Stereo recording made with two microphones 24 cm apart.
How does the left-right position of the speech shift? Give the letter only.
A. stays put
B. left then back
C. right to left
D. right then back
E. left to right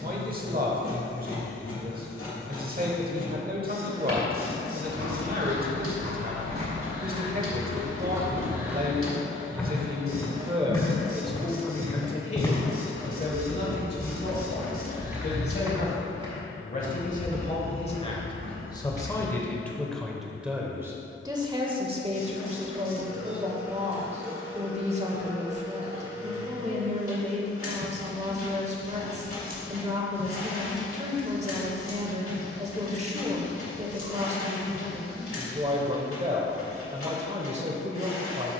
B.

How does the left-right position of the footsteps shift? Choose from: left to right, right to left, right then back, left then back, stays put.
left then back.